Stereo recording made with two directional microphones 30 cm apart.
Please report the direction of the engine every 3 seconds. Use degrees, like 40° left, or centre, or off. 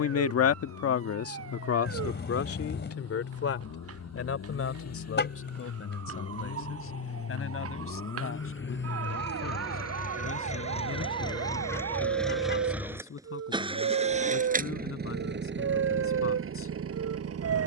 60° left, 60° left, 50° left, 20° left, 10° right, 40° right.